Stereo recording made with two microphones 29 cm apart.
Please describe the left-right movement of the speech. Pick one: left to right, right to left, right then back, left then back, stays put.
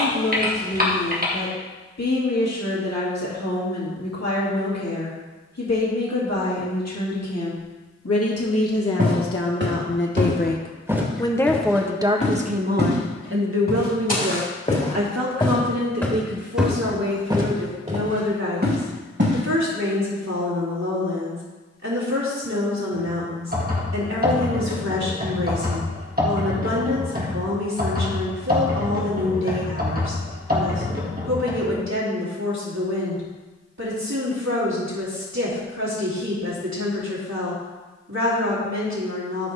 left to right.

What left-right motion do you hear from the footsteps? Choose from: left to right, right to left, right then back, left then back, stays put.
left then back.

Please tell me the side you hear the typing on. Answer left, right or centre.
right.